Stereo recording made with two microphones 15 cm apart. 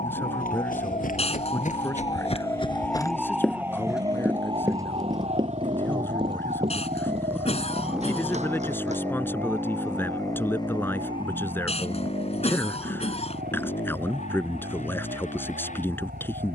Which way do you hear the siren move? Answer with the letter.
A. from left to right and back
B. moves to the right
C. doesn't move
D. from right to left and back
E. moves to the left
B.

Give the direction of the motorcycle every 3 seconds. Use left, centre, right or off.
right, right, centre, left, left, left.